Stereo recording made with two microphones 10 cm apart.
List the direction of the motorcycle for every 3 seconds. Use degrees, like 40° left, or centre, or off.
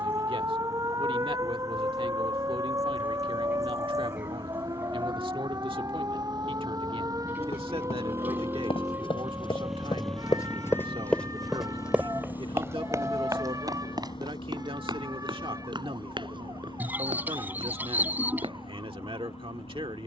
70° right, 60° right, 40° right, 10° left, 50° left, 70° left, 70° left.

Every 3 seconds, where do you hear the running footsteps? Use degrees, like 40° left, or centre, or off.
off, off, 80° left, 30° left, 40° right, 50° right, 60° right.